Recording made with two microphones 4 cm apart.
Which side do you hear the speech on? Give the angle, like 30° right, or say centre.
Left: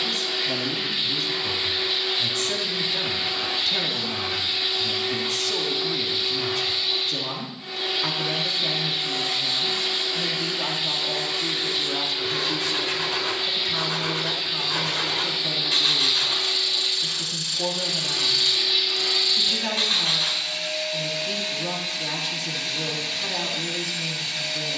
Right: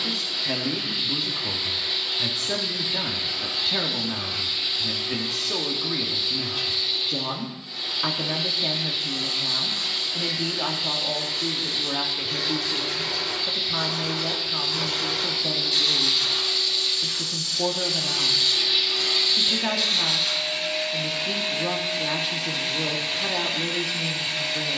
10° right.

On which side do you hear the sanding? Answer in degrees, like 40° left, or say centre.
60° left.